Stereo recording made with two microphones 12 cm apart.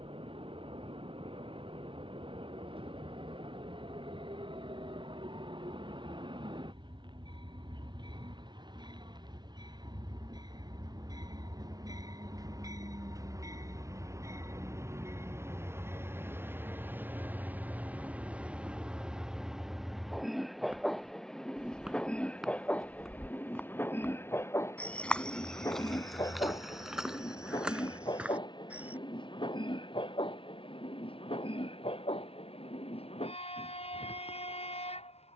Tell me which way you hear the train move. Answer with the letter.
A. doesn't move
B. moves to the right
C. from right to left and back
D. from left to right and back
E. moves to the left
E.